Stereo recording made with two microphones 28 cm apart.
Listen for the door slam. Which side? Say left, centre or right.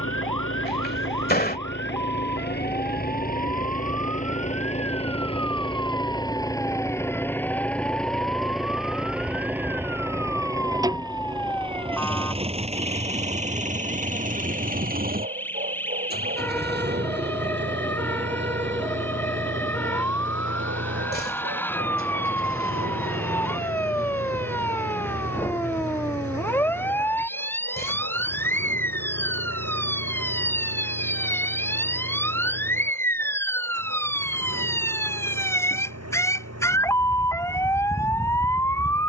left.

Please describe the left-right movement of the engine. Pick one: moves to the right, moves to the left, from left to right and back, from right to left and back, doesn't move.
moves to the right.